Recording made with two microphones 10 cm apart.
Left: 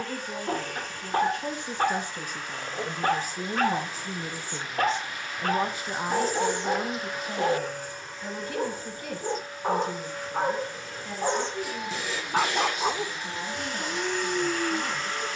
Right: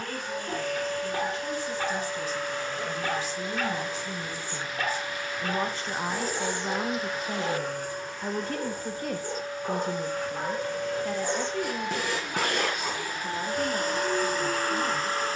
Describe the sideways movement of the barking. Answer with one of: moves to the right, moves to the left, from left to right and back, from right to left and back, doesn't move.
doesn't move.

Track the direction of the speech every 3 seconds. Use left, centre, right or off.
left, left, right, right, right.